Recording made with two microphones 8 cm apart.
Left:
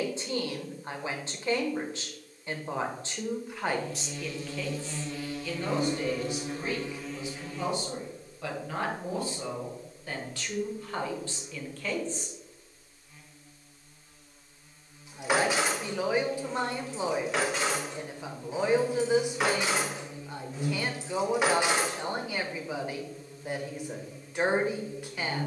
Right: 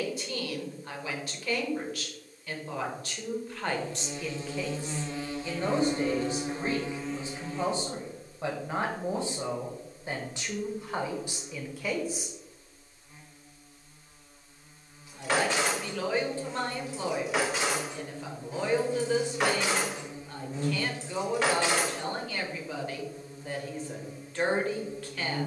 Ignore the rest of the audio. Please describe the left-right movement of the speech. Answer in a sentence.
You can hear the speech go right and come back.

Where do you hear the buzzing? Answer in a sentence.
You can hear the buzzing on the right.